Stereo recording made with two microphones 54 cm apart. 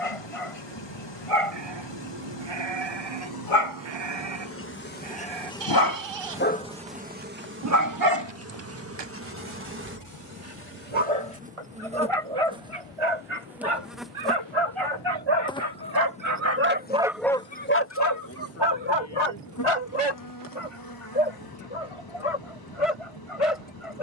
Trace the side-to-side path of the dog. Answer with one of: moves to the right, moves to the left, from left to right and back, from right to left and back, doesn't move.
from left to right and back.